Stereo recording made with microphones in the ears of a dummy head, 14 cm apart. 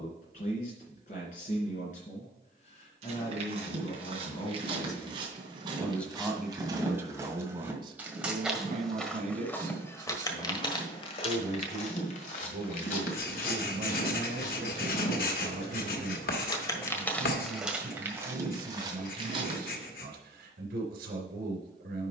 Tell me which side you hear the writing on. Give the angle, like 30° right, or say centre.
70° left.